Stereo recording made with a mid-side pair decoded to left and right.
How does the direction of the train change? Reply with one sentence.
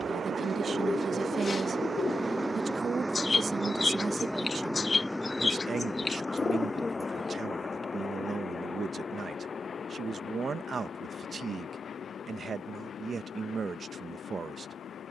You can hear the train move to the left.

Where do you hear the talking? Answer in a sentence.
In this clip you hear the talking on the right.